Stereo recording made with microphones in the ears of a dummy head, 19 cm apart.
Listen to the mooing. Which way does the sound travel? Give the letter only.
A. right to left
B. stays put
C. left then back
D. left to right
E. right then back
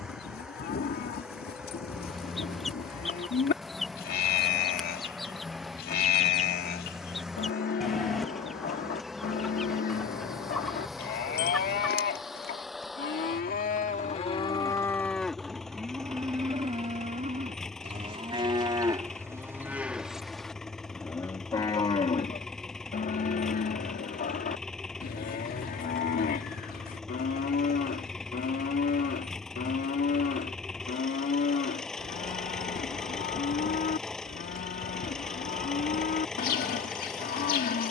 E.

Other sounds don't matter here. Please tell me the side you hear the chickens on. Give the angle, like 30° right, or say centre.
centre.